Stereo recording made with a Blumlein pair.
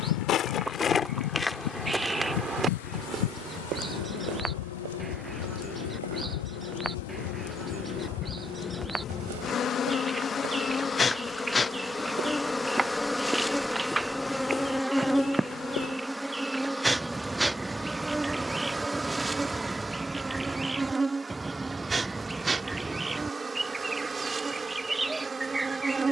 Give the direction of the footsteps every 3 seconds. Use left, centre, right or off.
centre, right, right, right, centre, left, off, off, off.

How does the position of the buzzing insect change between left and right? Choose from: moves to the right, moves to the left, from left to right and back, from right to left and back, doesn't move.
moves to the right.